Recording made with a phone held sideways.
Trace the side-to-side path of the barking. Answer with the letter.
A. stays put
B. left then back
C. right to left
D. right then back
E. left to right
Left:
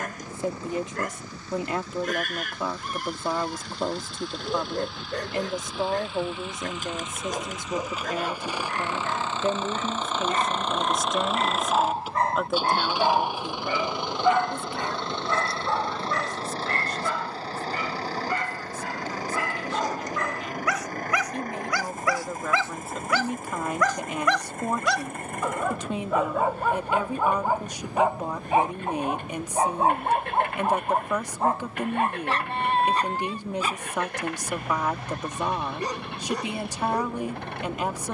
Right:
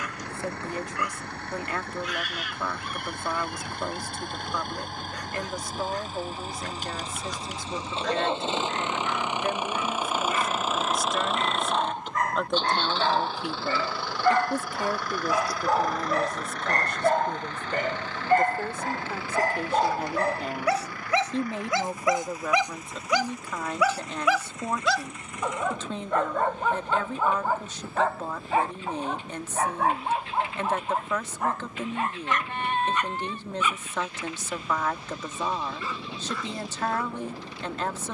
D.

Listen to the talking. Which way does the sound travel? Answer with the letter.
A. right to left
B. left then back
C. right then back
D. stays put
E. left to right
C.